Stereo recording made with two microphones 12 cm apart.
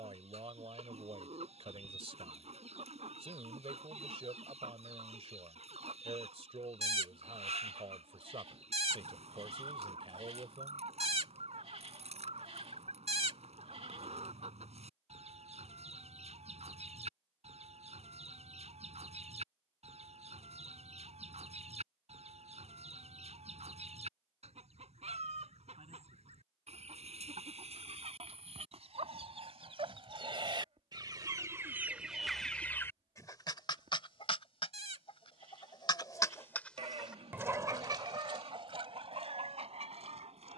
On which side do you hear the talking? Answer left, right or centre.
right.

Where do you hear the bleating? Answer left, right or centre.
right.